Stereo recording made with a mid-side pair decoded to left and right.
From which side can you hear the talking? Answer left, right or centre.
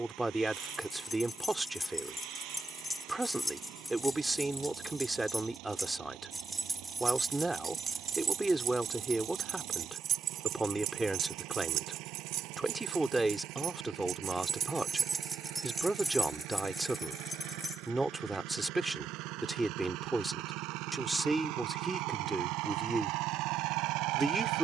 centre.